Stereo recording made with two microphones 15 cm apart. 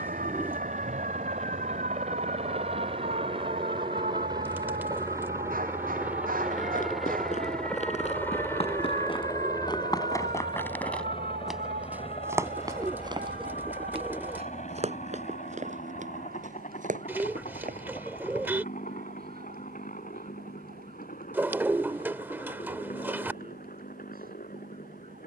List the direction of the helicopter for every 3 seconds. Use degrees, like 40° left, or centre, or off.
50° right, 30° right, centre, 30° left, 50° left, 60° left, 60° left, 70° left, 70° left.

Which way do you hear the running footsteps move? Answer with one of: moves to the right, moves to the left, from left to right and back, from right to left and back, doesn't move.
moves to the right.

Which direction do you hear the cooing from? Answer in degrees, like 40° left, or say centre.
10° right.